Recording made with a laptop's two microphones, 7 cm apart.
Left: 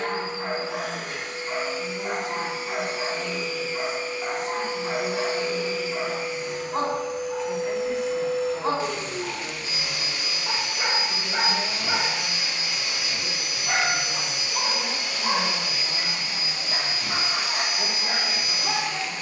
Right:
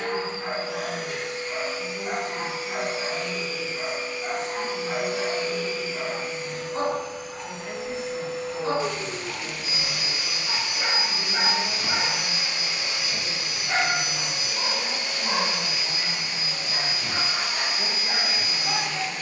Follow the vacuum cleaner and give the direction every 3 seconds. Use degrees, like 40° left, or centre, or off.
40° left, 30° left, 10° left, 20° right, 40° right, 50° right, 50° right.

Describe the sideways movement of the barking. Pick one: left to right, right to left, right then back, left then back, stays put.
stays put.